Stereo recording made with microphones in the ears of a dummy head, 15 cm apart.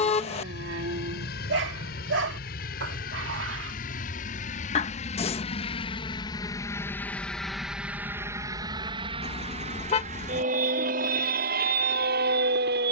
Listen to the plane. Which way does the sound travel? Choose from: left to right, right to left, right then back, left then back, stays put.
left to right.